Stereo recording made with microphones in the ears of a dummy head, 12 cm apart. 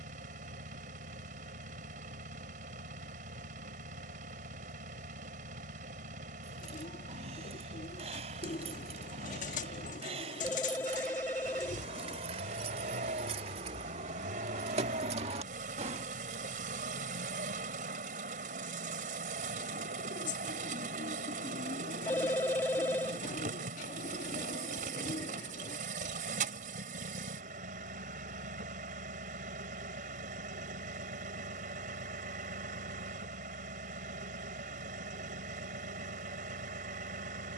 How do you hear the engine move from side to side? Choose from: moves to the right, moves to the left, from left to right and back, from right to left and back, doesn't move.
doesn't move.